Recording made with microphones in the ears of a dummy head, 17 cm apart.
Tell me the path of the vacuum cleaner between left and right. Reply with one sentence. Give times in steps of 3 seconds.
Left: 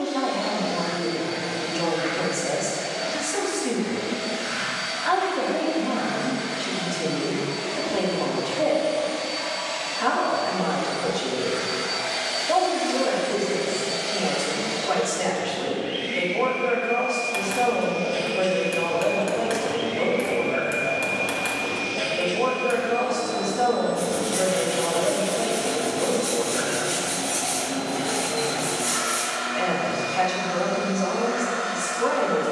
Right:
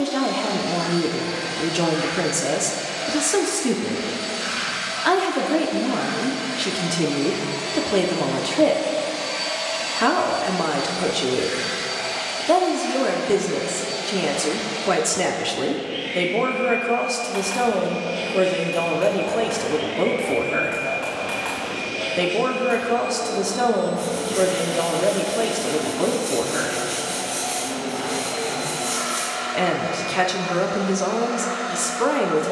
You can hear the vacuum cleaner on the right from 0 s and on the left from 12 s.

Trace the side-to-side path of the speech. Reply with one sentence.
You can hear the speech stay in one place.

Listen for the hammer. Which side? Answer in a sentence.
You can hear the hammer on the left.